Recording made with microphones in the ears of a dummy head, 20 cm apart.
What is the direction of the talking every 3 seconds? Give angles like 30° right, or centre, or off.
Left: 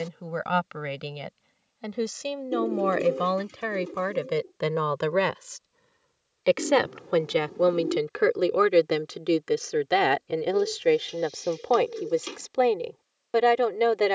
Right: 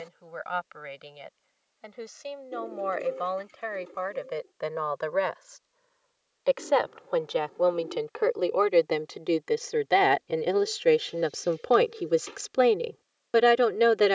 60° left, 50° left, 30° left, centre, 10° right.